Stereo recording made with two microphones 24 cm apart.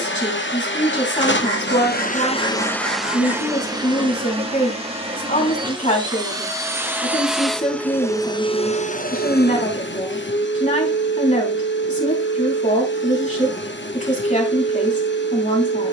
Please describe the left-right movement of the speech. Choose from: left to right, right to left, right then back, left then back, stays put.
stays put.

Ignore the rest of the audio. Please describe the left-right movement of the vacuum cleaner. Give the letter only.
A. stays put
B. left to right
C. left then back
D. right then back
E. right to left
D.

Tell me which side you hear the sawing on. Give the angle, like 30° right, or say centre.
80° right.